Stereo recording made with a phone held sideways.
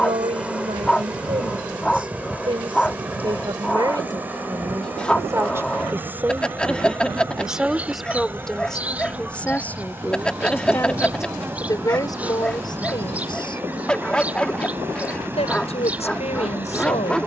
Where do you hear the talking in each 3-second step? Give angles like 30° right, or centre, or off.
30° right, 20° right, centre, 10° left, 30° left, 40° left.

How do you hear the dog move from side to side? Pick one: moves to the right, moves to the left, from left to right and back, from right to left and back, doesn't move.
doesn't move.